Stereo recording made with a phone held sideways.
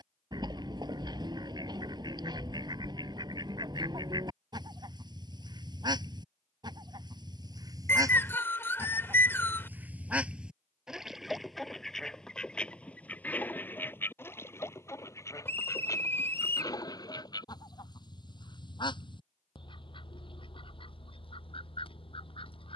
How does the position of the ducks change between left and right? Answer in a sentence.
In this clip you hear the ducks move from right to left.